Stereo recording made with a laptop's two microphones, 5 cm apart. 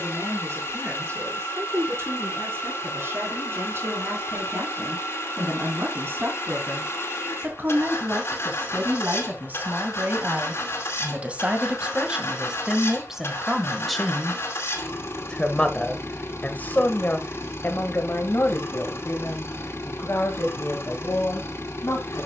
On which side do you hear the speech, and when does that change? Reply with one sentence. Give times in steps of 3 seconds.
In this clip you hear the speech on the right from 0 s, in the centre from 12 s and on the left from 15 s.